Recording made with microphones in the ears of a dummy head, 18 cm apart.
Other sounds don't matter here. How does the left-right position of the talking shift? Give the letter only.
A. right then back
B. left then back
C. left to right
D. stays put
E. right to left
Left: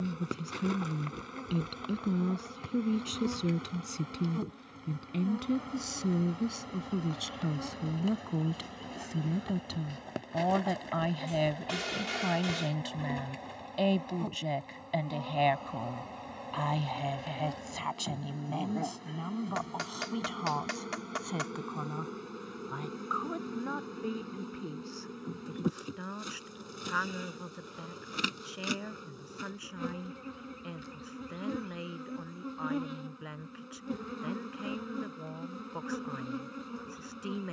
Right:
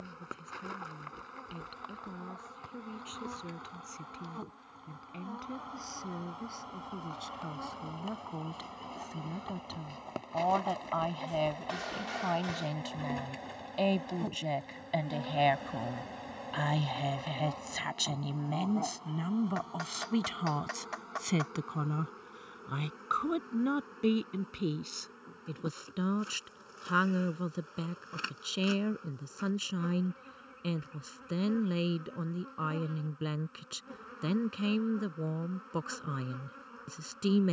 C.